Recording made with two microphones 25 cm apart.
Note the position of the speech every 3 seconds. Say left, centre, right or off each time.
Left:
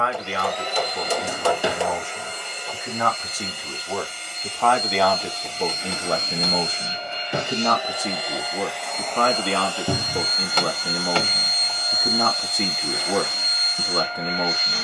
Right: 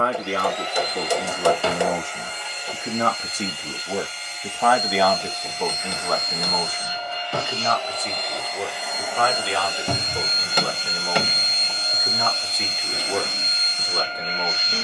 right, centre, left, left, left.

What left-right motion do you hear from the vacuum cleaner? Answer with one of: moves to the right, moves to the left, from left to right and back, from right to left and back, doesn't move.
moves to the right.